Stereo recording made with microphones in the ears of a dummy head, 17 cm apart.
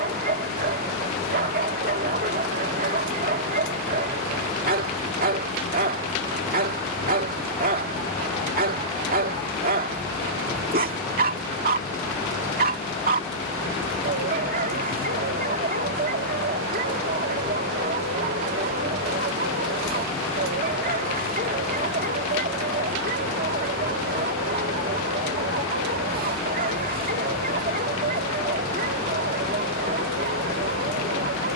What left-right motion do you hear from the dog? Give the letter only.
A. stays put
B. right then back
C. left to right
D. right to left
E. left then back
A.